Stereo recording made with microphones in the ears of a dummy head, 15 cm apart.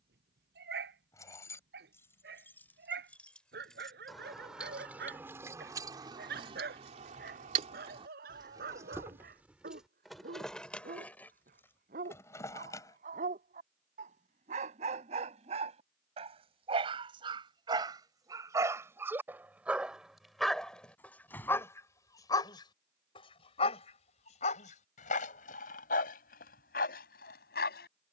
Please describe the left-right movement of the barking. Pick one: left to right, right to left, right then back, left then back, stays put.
right to left.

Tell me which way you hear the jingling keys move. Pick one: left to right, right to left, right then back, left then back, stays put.
right then back.